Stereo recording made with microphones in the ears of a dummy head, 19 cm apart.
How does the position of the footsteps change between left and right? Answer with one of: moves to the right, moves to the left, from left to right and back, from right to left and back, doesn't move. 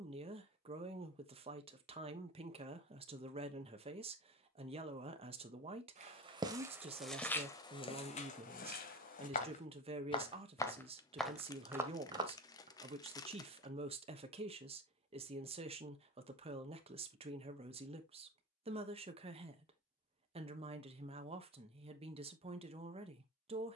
from right to left and back.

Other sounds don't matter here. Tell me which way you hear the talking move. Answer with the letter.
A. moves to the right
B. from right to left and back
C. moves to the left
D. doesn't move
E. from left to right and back
D.